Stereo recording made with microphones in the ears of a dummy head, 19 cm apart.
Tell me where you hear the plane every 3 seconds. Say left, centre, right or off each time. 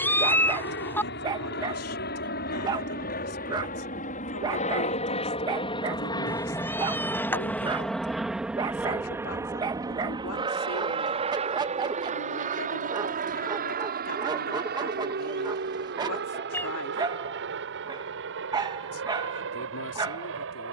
left, left, centre, right, right, right, right.